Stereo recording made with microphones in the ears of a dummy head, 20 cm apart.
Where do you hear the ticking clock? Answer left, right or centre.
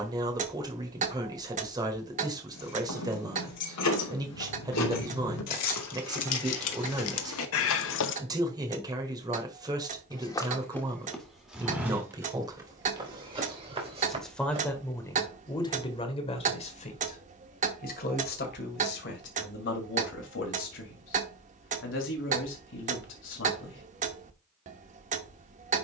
right.